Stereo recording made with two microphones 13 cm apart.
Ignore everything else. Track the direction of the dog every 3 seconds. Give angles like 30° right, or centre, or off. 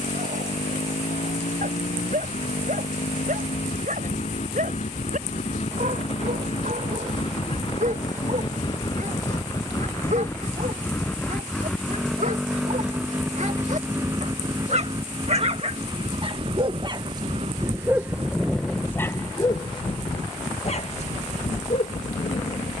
80° right, 80° right, 70° right, 70° right, 60° right, 40° right, 20° left, 60° left.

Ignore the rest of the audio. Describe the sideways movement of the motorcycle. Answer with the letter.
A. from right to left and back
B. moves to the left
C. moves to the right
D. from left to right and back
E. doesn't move
C.